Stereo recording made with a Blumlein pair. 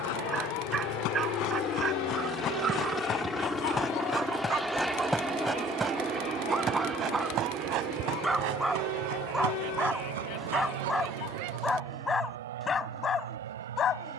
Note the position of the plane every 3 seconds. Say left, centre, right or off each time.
left, centre, right, right, right.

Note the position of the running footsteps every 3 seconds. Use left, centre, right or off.
left, centre, right, right, off.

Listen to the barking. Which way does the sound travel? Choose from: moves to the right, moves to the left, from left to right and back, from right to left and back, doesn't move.
moves to the left.